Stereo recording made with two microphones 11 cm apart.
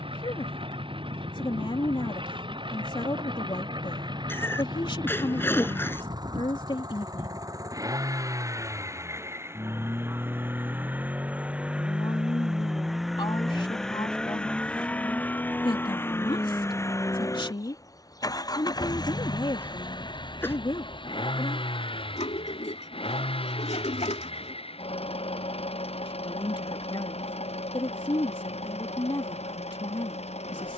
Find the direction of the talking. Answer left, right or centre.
left.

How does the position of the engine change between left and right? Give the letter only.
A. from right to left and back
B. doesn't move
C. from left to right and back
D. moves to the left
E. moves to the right
D.